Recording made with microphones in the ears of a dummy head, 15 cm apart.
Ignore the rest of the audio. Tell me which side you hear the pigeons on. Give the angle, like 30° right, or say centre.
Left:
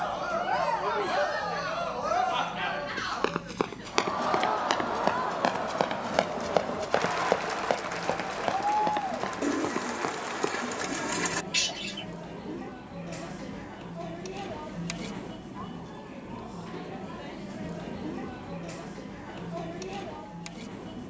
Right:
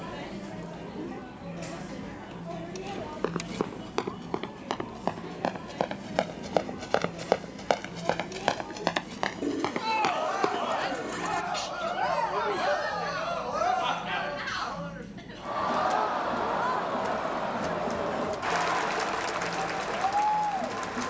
60° left.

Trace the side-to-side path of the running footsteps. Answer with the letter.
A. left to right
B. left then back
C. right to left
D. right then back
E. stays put
A.